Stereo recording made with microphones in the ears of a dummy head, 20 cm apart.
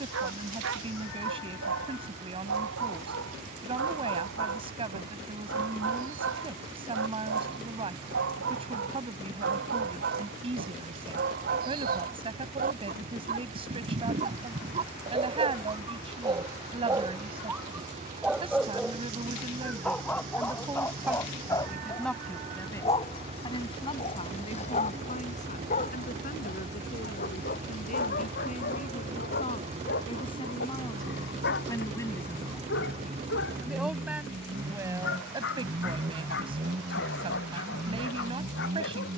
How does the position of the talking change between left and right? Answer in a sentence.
In this clip you hear the talking move from right to left and back again.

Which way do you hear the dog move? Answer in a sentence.
You can hear the dog move from right to left.